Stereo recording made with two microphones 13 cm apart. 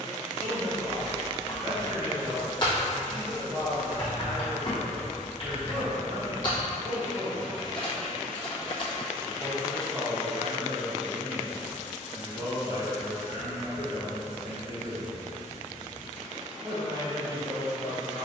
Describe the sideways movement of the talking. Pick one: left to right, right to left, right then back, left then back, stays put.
stays put.